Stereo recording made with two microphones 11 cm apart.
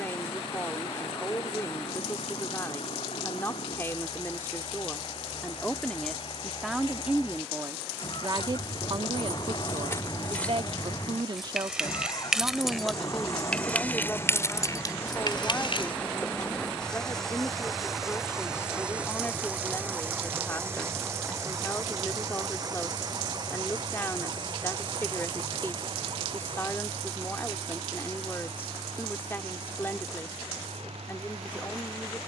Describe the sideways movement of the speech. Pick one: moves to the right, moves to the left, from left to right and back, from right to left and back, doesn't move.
from left to right and back.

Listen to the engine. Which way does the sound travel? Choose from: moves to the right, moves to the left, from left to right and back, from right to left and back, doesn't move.
moves to the right.